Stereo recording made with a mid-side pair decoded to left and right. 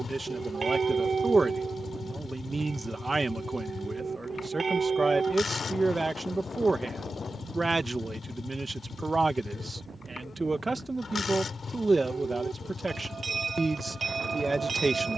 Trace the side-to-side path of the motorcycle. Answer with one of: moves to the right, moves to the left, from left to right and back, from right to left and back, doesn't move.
doesn't move.